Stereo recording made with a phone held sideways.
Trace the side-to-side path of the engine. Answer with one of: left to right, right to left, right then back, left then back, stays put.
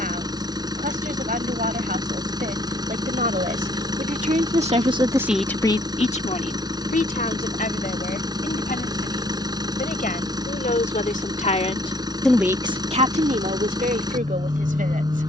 stays put.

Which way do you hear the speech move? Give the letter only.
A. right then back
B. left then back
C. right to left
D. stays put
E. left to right
B.